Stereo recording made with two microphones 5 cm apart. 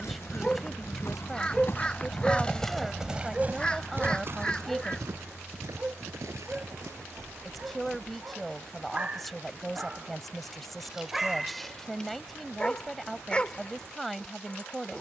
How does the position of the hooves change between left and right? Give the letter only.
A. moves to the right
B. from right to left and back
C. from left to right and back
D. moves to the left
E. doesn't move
A.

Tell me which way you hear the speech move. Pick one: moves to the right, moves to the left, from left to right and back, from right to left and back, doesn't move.
doesn't move.